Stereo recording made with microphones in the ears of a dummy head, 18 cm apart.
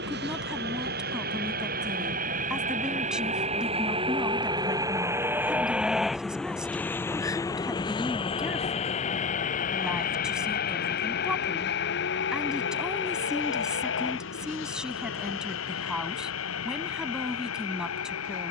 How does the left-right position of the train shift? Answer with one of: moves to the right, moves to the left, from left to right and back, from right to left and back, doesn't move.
moves to the left.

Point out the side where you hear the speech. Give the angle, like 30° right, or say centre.
centre.